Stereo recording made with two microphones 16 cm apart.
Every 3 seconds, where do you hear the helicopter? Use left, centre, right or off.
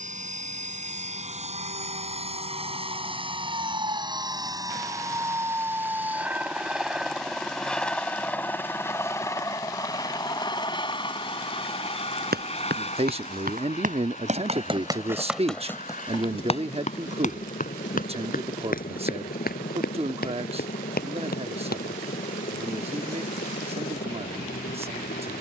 right, right, centre, left, left, left, left, left, left.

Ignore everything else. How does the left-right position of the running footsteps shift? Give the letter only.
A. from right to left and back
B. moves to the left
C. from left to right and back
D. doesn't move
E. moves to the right
B.